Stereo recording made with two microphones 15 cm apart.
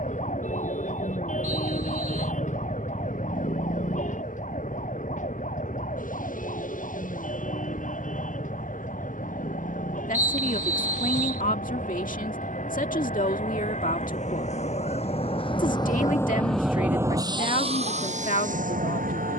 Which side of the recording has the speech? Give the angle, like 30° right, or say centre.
70° left.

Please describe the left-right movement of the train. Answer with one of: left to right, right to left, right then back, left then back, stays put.
left to right.